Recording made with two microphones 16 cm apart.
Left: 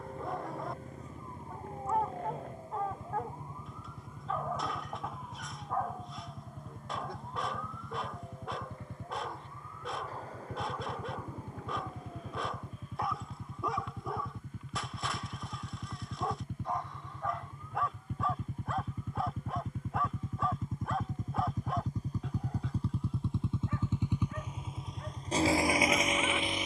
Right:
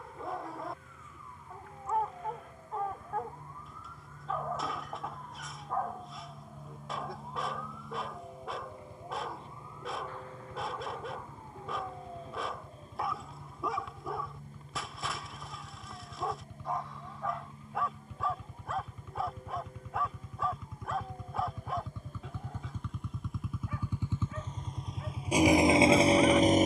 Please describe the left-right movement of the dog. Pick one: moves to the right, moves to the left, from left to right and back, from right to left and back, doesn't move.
doesn't move.